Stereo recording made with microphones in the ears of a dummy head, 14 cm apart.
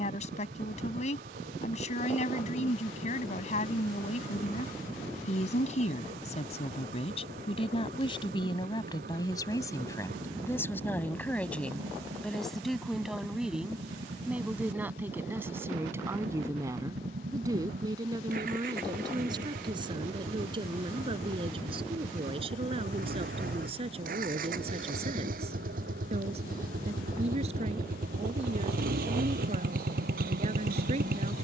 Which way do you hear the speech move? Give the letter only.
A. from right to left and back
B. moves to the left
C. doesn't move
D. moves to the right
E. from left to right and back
D.